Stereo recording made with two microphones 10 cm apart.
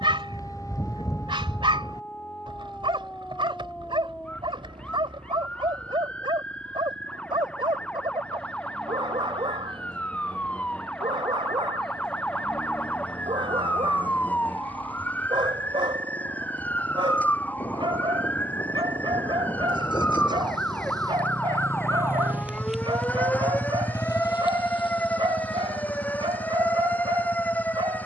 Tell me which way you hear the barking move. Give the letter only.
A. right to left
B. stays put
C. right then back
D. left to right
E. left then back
B.